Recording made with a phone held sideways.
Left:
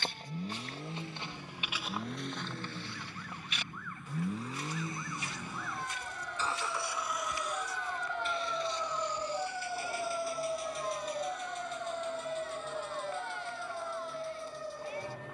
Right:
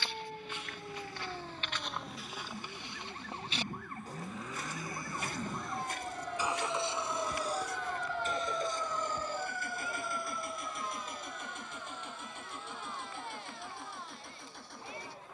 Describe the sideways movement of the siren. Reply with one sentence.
You can hear the siren travel towards the left.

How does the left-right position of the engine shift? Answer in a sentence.
In this clip you hear the engine travel towards the right.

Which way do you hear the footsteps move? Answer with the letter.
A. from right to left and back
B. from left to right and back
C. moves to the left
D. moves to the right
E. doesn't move
D.